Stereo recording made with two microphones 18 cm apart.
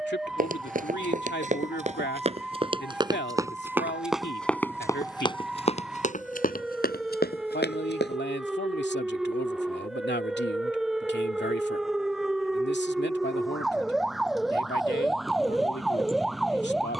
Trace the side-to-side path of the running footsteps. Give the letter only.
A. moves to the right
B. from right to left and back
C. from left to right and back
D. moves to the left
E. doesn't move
D.